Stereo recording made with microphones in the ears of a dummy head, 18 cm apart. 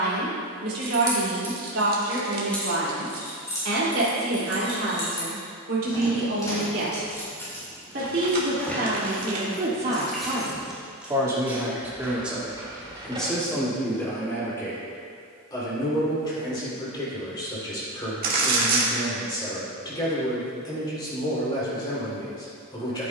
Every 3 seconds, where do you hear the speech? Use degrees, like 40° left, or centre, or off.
70° right, 70° right, 50° right, 20° right, 10° left, 20° left, 20° left, 20° left.